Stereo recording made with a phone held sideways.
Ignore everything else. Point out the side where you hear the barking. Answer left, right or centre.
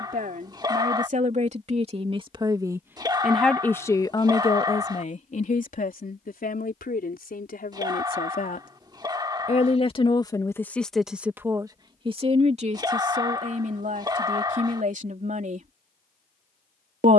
right.